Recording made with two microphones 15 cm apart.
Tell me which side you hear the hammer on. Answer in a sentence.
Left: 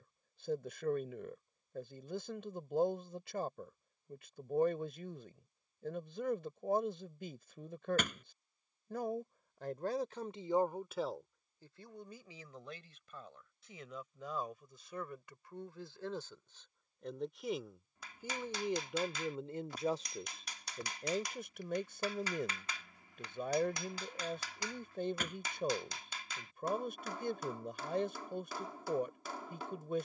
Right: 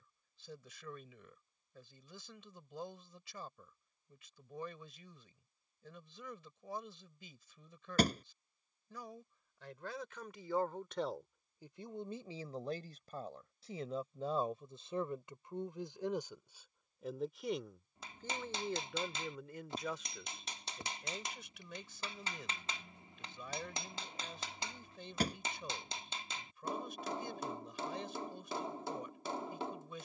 In this clip you hear the hammer on the right.